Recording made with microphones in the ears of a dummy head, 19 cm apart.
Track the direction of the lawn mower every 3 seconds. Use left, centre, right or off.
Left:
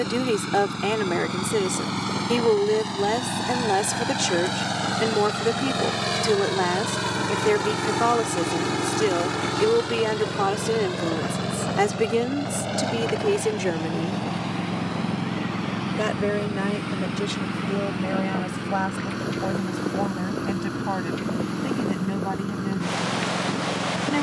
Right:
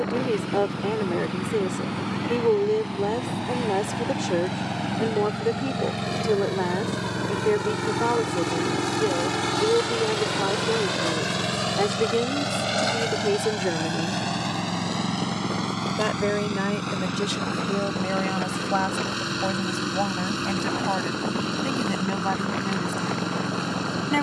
left, left, left, right, right, right, right, right.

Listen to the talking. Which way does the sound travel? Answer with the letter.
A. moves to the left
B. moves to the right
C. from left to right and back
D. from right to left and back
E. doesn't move
B.